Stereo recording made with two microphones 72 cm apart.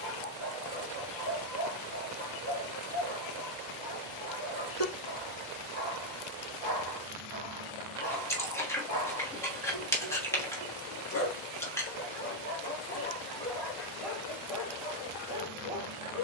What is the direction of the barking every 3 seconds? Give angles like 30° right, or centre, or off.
40° left, 40° left, 40° left, 30° left, 10° left, 10° right.